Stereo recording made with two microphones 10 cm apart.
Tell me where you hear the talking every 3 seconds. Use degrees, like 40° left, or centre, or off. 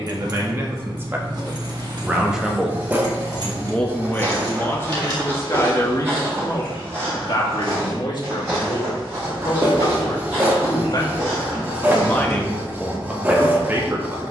20° right, 20° left, 50° left, 50° left, 10° right.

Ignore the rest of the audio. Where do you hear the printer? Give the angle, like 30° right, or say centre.
20° right.